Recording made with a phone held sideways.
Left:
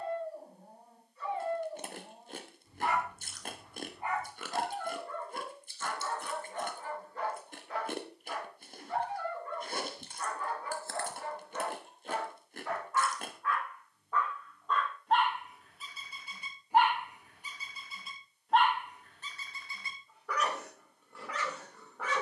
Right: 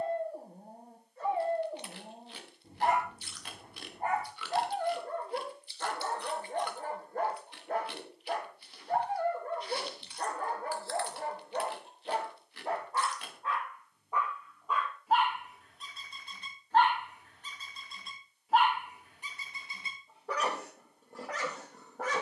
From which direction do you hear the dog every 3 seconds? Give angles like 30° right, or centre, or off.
50° right, 50° right, 50° right, 40° right, 20° right, 10° left, 20° right, 40° right.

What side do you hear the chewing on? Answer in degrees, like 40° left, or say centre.
40° left.